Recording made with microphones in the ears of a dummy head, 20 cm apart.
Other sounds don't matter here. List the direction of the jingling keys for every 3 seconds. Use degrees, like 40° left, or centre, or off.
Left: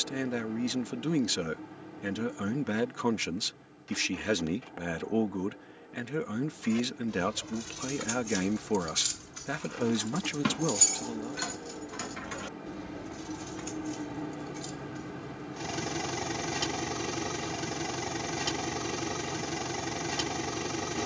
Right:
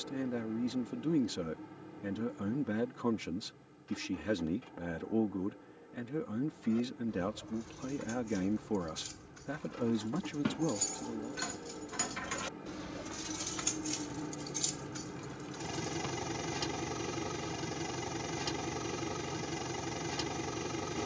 off, off, 70° left, 40° left, 40° right, 60° right, off.